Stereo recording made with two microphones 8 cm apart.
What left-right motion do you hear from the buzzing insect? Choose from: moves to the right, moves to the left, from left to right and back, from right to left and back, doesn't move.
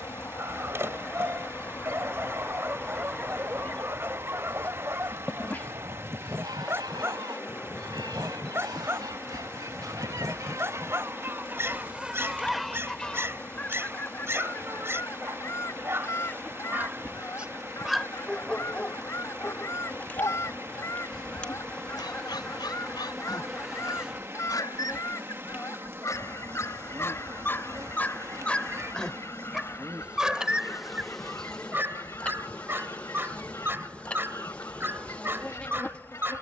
from left to right and back.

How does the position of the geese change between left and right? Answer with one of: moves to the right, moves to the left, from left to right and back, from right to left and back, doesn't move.
from left to right and back.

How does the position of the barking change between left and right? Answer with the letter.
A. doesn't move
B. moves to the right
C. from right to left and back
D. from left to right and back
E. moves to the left
C.